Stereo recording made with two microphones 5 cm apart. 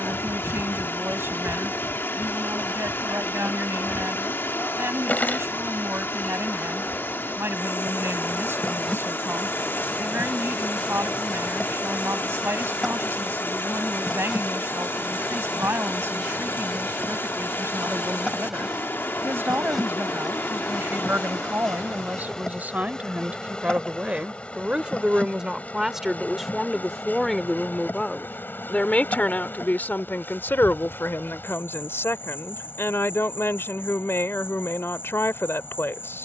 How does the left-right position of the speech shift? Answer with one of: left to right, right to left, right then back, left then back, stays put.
right to left.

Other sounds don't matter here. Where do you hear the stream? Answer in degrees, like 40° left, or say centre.
40° left.